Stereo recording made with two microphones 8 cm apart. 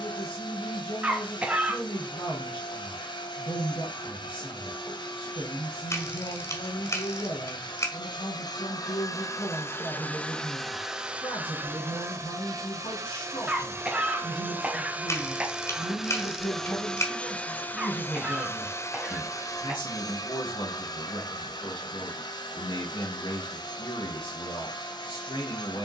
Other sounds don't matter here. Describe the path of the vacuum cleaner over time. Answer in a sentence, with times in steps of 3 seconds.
In this clip you hear the vacuum cleaner on the left from 0 s, in the centre from 9 s, on the right from 12 s, in the centre from 15 s and on the left from 18 s.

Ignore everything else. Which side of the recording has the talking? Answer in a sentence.
In this clip you hear the talking on the left.